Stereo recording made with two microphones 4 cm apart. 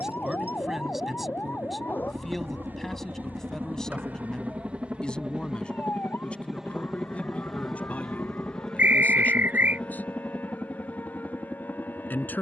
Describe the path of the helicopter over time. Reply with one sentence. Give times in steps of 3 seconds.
You can hear the helicopter on the right from 0 s, in the centre from 6 s and on the left from 9 s.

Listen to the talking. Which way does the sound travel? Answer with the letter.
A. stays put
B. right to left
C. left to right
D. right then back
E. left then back
B.